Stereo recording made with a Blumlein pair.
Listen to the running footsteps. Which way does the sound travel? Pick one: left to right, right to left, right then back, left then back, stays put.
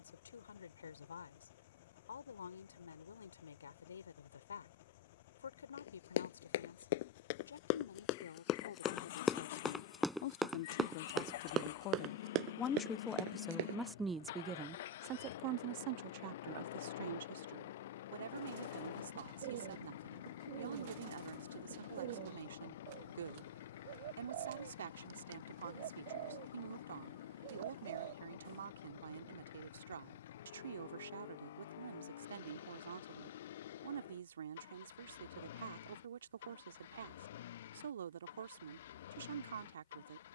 left to right.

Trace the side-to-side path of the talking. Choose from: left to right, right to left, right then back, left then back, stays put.
left to right.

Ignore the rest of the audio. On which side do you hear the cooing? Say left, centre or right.
right.